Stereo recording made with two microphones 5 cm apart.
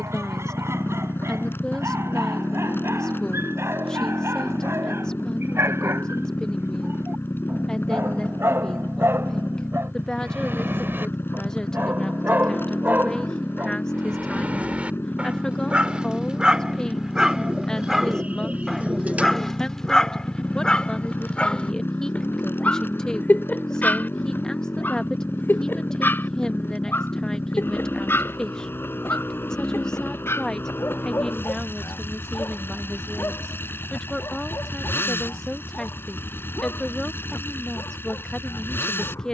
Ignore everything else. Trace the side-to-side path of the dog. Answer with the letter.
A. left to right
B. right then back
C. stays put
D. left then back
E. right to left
E.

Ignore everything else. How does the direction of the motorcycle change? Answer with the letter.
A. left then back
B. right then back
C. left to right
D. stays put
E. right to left
D.